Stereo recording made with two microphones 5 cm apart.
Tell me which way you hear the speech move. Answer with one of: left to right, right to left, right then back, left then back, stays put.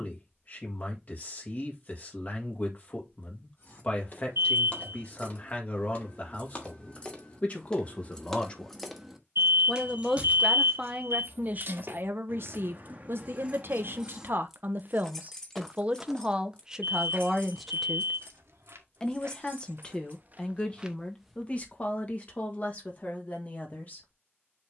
right then back.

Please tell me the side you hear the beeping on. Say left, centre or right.
right.